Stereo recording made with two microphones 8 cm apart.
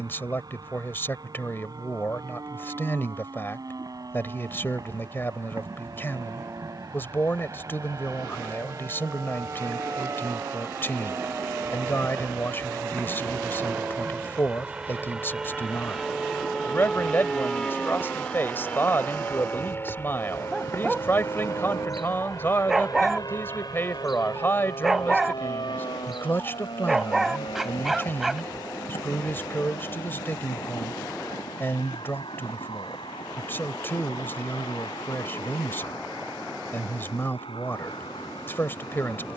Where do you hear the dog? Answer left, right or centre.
centre.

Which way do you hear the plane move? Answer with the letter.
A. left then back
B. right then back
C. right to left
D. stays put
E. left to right
C.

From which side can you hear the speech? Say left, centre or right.
left.